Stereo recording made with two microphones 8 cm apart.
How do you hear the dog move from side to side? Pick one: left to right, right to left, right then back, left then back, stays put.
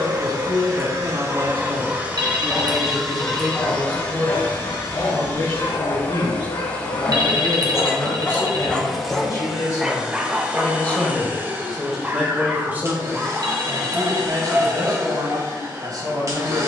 left then back.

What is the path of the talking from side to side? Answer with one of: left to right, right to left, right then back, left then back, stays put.
left then back.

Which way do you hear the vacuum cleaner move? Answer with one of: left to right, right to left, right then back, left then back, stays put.
left then back.